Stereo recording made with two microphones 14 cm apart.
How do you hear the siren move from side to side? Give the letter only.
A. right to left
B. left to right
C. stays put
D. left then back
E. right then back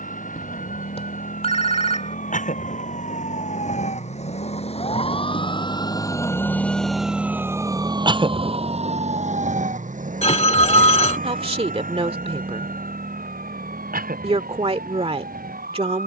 B.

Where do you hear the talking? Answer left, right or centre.
right.